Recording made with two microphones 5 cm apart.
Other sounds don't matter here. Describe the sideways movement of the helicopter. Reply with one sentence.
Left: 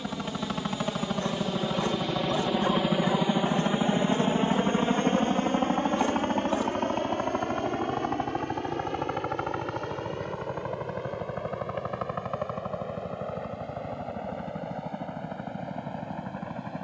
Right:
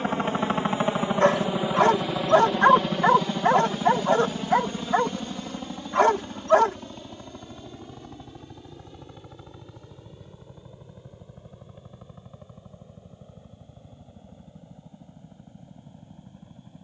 You can hear the helicopter move to the left.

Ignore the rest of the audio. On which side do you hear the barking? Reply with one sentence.
In this clip you hear the barking on the right.